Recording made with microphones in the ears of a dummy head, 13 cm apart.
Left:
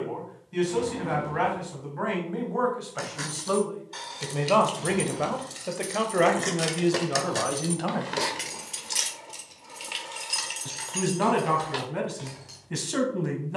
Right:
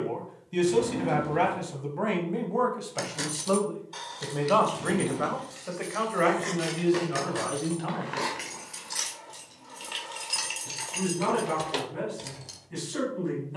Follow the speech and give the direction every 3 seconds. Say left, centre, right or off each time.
right, centre, left, left, left.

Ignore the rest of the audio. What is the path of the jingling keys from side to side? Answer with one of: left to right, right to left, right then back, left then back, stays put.
left then back.